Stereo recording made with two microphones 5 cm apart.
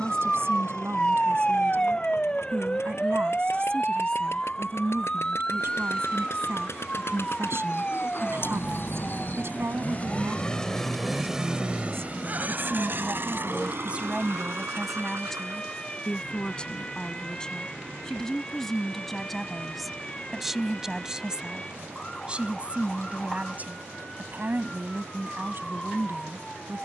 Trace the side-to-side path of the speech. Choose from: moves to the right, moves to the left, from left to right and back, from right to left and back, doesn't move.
from right to left and back.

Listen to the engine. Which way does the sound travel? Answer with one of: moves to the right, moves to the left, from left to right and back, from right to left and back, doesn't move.
moves to the right.